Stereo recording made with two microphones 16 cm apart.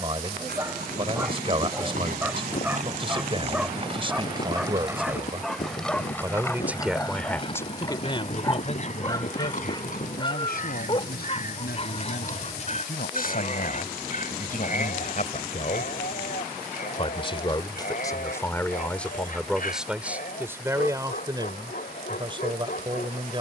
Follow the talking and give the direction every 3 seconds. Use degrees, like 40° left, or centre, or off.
30° right, 30° right, 10° left, 60° left, 60° left, 40° left, centre, 30° right.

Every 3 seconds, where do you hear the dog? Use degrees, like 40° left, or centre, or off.
10° right, centre, 10° left, 30° left, 50° left, 60° left, 60° left, 60° left.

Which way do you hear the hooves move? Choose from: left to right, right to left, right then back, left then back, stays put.
right to left.